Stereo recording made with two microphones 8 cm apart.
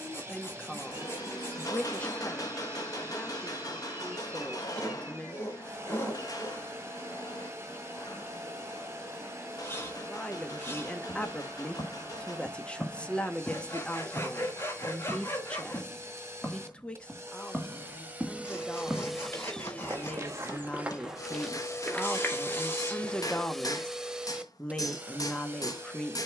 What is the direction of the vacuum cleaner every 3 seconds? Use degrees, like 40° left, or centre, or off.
30° right, 30° right, 30° right, 30° right, 30° right, 30° right, centre, 20° left, 20° right.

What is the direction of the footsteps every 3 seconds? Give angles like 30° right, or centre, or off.
off, off, off, 40° left, 30° left, 10° left, 20° right, 20° left, off.